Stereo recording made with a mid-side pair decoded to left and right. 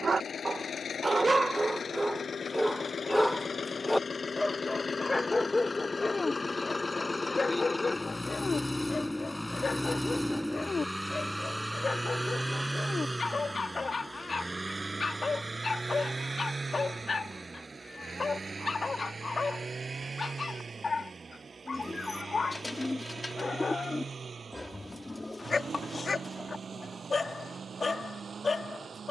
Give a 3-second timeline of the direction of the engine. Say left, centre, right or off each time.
left, left, left, centre, right, right, right, right, right, right.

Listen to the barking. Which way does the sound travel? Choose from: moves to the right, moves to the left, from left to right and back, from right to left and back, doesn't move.
moves to the left.